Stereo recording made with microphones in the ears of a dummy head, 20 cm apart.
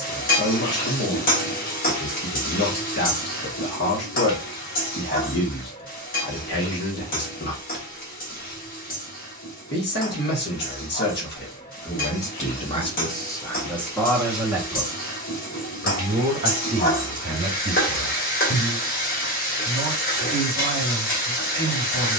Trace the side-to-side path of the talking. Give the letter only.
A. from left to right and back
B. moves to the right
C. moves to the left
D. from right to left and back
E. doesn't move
B.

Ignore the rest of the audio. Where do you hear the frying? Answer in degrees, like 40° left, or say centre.
40° left.